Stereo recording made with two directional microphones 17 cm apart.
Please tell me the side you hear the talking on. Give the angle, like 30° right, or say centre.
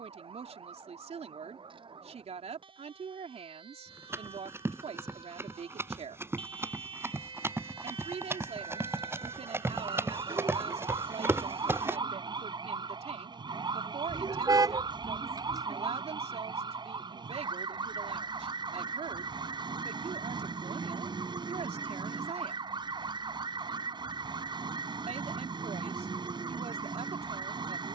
40° right.